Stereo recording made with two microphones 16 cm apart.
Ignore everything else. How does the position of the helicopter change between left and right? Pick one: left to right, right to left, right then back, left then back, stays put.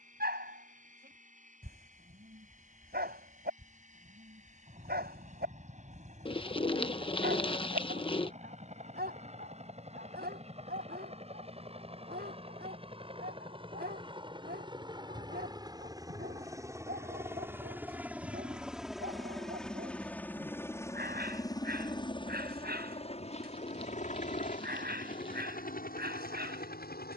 right to left.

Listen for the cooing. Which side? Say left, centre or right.
left.